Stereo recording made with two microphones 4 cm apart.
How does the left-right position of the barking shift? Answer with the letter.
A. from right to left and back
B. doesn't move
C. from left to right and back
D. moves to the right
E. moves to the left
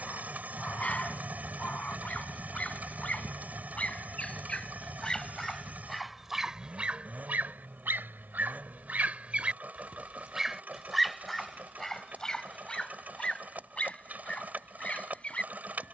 C.